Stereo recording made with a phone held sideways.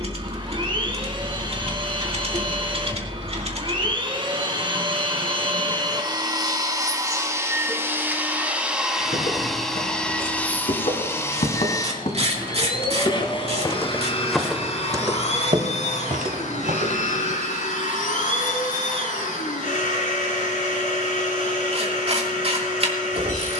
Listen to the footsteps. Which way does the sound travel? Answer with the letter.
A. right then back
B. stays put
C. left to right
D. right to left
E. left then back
C.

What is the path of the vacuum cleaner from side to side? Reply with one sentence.
In this clip you hear the vacuum cleaner move from right to left.